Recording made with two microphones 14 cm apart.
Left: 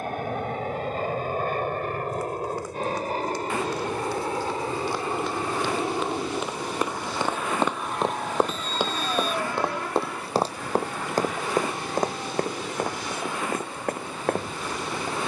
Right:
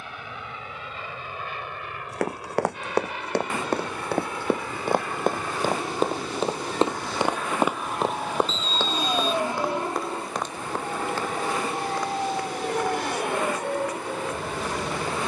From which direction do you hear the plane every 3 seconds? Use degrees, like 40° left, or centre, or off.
50° left, 30° left, centre, 30° right, 50° right.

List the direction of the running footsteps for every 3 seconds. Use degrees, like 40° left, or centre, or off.
70° right, 60° right, 10° right, 30° left, 50° left.